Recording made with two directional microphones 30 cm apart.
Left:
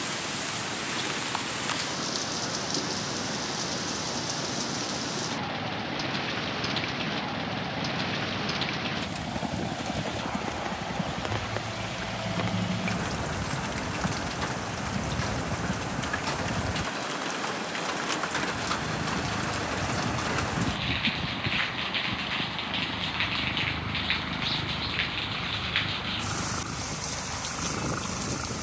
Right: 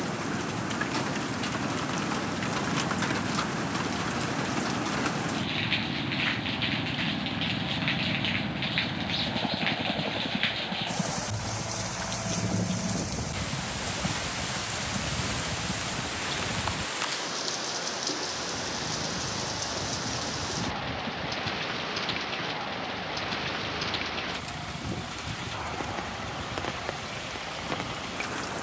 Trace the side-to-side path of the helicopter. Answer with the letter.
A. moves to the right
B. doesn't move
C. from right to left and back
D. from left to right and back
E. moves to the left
E.